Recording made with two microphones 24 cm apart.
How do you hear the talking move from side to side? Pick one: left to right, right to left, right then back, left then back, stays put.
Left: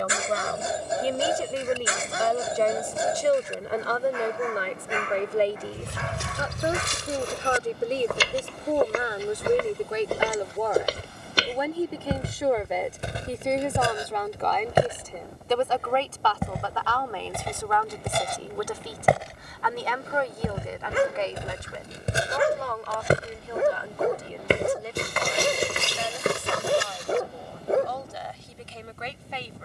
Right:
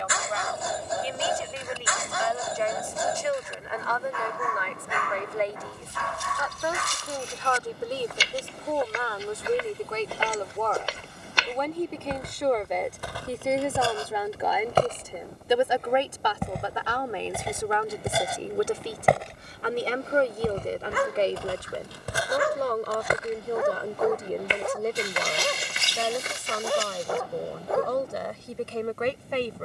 left to right.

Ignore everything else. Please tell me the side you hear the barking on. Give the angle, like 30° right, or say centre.
30° left.